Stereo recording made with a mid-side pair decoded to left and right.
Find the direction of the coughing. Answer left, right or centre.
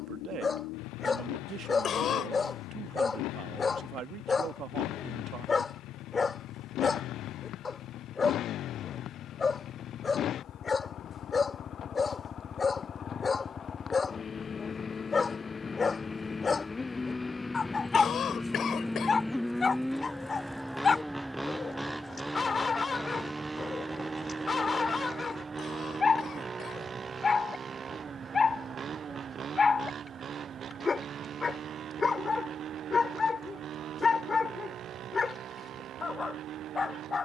left.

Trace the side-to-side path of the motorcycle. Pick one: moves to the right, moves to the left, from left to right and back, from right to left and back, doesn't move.
moves to the right.